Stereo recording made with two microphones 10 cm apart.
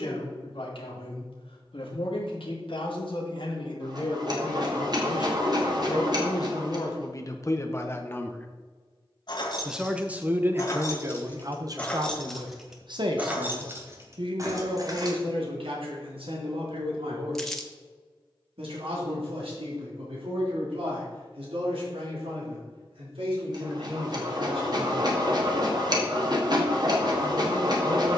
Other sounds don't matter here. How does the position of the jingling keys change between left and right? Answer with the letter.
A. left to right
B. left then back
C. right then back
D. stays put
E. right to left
A.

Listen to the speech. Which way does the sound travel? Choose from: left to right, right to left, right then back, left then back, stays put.
left to right.